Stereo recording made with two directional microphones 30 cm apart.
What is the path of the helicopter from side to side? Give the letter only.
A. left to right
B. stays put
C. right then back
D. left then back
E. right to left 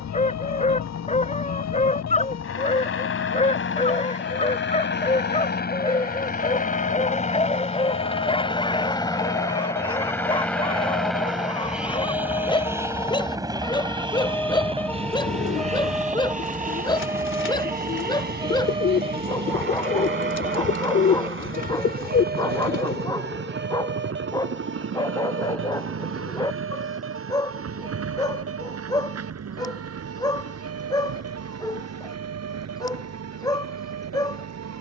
A.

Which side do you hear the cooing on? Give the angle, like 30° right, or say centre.
40° left.